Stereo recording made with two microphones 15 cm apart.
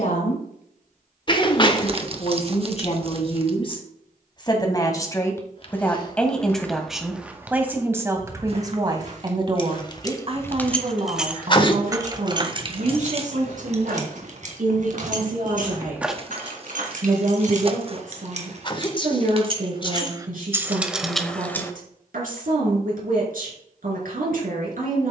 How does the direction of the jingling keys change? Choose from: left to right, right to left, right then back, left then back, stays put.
right then back.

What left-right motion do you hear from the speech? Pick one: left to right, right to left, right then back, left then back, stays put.
left to right.